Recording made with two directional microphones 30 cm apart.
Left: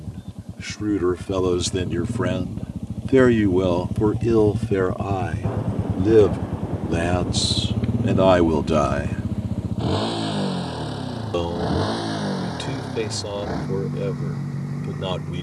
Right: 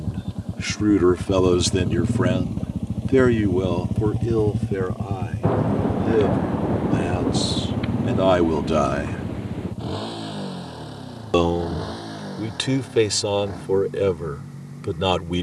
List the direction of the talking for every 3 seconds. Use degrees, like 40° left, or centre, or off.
20° right, 30° left, 30° left, 30° right, 50° right.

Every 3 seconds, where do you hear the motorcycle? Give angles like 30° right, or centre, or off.
40° right, 10° right, 20° left, 50° left, 60° left.